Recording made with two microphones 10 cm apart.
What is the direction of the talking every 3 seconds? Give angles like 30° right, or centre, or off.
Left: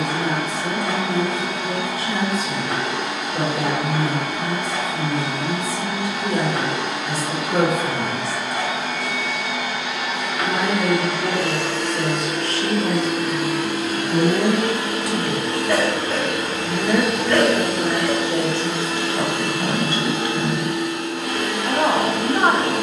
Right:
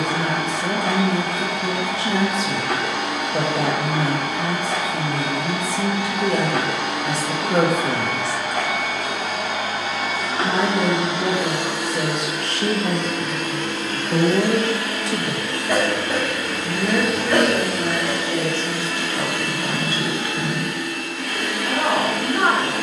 70° right, 70° right, 70° right, 70° right, 50° right, centre, 20° left, 20° left.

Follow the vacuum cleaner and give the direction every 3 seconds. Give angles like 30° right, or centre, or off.
60° right, 60° right, 60° right, 30° right, 10° left, 20° left, 20° left, 20° left.